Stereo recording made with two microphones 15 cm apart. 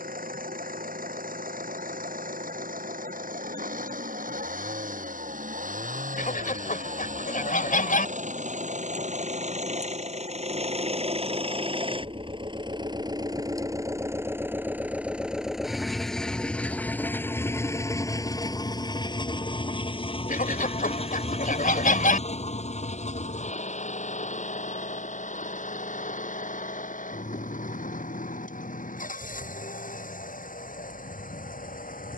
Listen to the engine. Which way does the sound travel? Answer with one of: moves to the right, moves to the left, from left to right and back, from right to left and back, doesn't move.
moves to the left.